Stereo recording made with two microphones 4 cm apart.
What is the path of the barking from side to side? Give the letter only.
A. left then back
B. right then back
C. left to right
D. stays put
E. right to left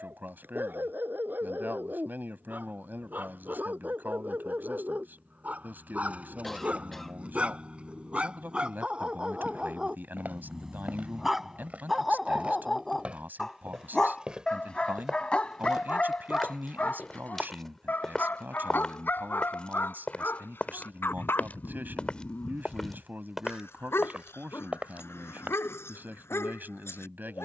E.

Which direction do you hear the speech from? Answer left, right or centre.
right.